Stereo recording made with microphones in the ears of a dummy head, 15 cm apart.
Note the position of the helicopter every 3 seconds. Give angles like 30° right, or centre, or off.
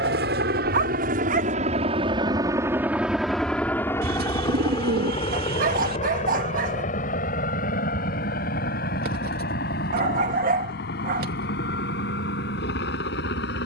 40° right, 20° left, 40° left, 50° left, 60° left.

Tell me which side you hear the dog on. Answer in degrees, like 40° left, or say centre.
50° right.